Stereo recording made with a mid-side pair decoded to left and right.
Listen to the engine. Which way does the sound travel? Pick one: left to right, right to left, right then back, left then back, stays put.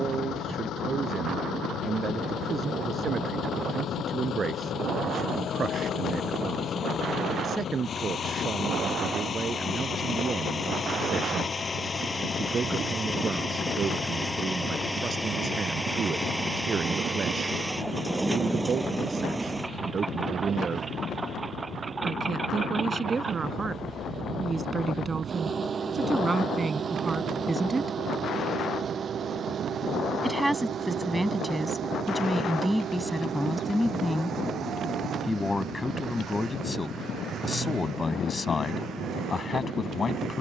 left to right.